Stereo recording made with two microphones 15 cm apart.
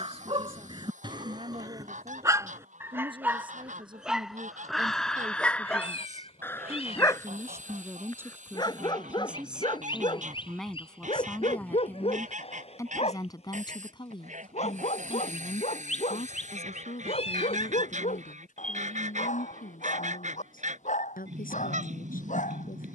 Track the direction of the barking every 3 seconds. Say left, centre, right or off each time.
right, centre, left, left, left, left, left, left.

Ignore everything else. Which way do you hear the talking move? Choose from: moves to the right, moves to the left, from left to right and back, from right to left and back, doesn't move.
moves to the left.